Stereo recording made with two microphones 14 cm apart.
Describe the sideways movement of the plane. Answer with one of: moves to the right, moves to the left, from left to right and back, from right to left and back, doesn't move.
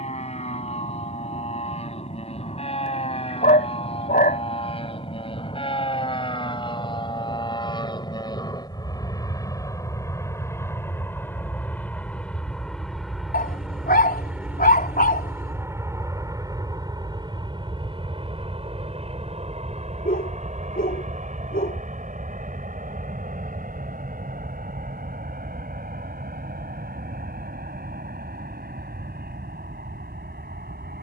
moves to the right.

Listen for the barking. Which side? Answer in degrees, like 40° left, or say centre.
80° left.